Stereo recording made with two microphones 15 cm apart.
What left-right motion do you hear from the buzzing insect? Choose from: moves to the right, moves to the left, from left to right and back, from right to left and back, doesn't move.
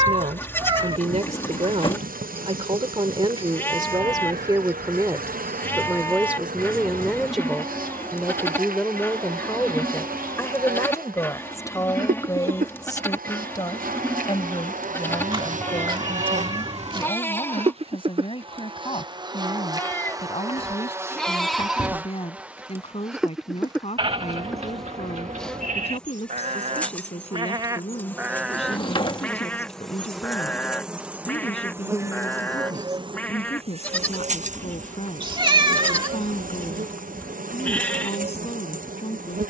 from right to left and back.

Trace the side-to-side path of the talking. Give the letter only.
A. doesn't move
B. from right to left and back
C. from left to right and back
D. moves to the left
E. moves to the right
D.